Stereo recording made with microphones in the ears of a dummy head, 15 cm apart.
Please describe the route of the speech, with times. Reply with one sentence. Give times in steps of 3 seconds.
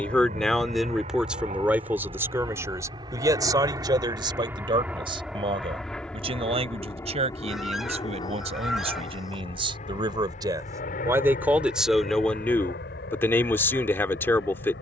In this clip you hear the speech in the centre from 0 s, on the right from 3 s and in the centre from 12 s.